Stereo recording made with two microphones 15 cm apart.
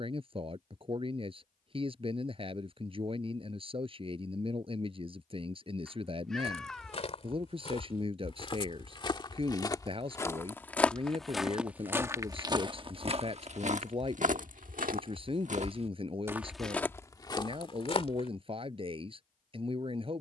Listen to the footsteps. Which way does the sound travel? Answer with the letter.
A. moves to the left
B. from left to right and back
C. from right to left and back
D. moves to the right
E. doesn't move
B.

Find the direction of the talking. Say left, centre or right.
right.